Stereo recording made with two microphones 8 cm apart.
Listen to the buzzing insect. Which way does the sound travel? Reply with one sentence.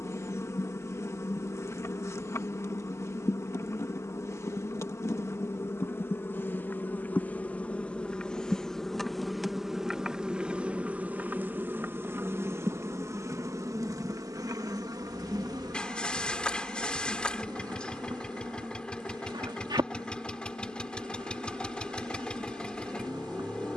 You can hear the buzzing insect travel towards the right.